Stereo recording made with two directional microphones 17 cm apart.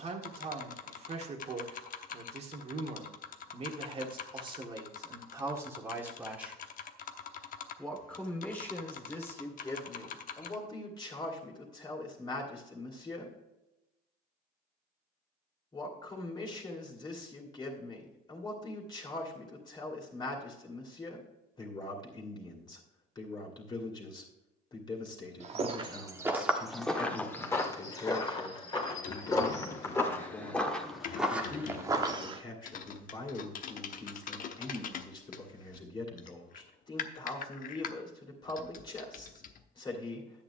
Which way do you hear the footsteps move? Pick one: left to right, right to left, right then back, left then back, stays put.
left then back.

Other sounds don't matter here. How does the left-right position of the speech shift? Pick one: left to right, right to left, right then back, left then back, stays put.
right to left.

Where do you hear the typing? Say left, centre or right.
left.